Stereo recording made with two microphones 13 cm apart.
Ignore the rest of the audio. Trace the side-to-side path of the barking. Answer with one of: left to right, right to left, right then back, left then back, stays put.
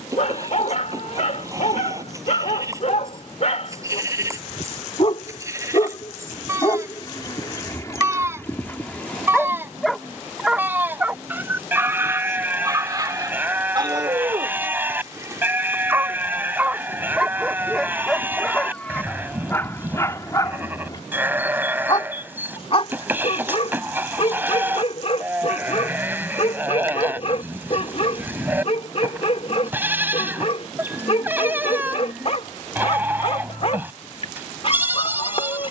right then back.